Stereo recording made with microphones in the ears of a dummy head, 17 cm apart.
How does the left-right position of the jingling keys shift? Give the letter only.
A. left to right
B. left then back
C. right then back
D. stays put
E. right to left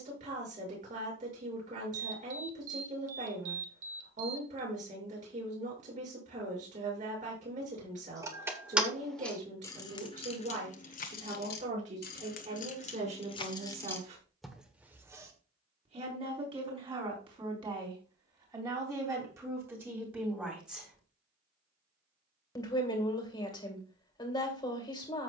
B.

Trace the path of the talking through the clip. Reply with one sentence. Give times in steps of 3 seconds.
In this clip you hear the talking on the right from 0 s, in the centre from 18 s and on the left from 21 s.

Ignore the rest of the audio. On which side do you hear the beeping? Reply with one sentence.
In this clip you hear the beeping on the right.